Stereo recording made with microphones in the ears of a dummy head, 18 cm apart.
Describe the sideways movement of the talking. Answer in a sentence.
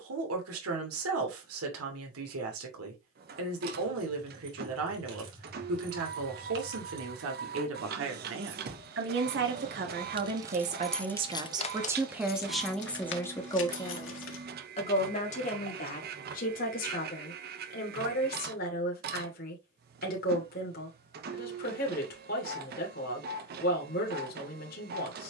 In this clip you hear the talking travel towards the left.